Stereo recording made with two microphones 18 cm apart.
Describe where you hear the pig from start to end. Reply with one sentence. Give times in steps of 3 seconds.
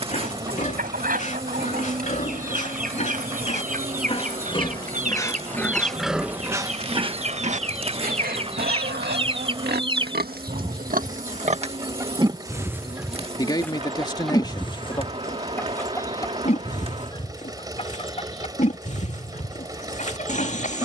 You can hear the pig on the left from 0 s, on the right from 6 s, in the centre from 12 s and on the left from 15 s.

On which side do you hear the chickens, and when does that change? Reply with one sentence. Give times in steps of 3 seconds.
You can hear the chickens on the right from 0 s, in the centre from 12 s and on the left from 15 s.